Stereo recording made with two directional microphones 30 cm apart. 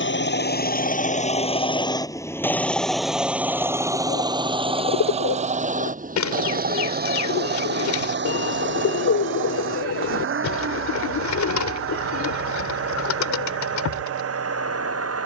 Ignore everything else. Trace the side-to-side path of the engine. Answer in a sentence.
You can hear the engine move to the right.